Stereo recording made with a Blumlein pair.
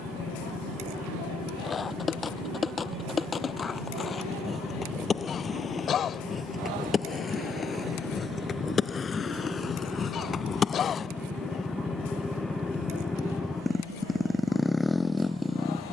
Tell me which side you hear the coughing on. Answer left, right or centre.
left.